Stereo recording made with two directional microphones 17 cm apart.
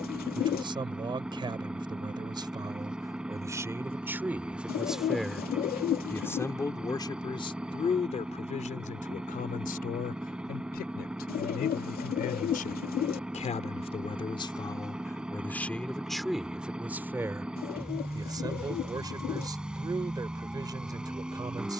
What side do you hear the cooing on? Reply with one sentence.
In this clip you hear the cooing on the left.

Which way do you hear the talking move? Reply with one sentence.
You can hear the talking move from right to left and back again.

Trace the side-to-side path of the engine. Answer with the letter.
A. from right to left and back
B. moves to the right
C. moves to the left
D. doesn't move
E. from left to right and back
D.